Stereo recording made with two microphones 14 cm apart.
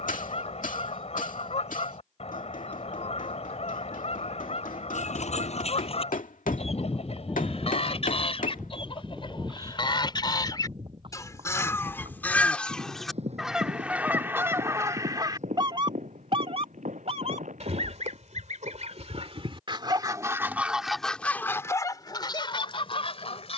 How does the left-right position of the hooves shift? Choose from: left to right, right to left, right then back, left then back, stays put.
left to right.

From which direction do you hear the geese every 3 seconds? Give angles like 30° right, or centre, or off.
50° left, 50° left, 50° left, 30° left, 10° right, 40° right, 40° right, 30° left.